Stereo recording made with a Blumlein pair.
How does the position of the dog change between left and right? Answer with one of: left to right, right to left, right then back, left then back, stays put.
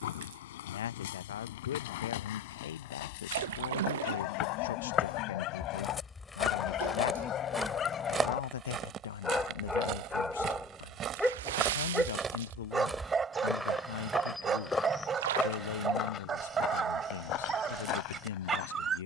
left to right.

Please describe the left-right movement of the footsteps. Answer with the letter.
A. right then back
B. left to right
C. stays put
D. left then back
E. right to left
A.